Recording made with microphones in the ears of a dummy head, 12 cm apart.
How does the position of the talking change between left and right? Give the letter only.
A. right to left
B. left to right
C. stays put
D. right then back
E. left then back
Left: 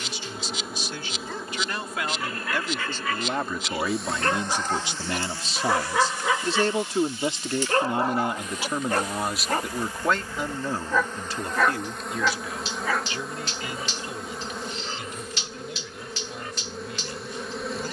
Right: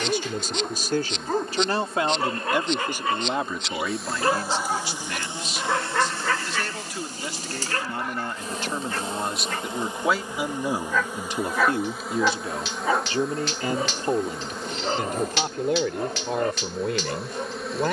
E.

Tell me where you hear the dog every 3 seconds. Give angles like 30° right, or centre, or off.
40° right, 10° right, 20° left, 20° left, 30° right, 40° right.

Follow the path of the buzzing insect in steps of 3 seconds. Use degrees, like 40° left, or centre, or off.
10° left, 10° right, 30° right, 20° right, centre, centre.